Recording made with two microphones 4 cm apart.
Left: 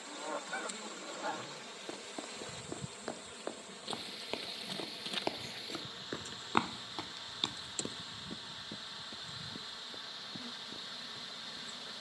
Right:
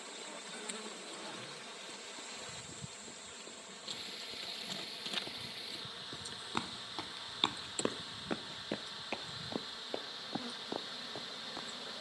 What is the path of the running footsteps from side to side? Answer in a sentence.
In this clip you hear the running footsteps go from the left side to the right.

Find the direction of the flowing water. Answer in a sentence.
In this clip you hear the flowing water in the centre.